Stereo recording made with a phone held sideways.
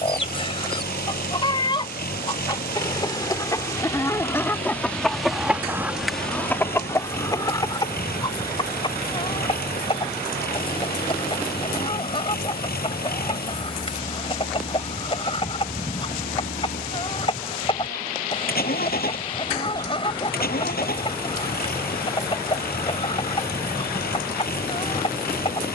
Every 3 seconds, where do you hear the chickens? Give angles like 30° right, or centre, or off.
30° left, 10° left, 20° left, 30° left, 30° left, 30° left, 30° left, 30° left, 30° left.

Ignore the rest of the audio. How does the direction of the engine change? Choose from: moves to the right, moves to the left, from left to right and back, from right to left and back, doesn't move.
doesn't move.